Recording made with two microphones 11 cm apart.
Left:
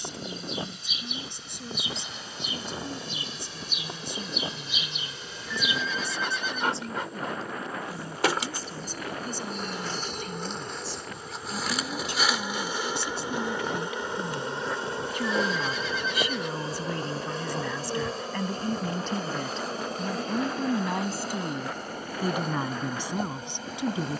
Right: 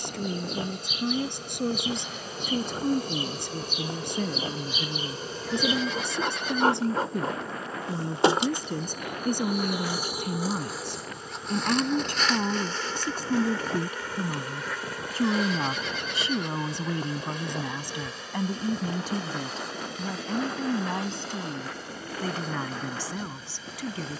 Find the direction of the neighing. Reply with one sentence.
You can hear the neighing on the right.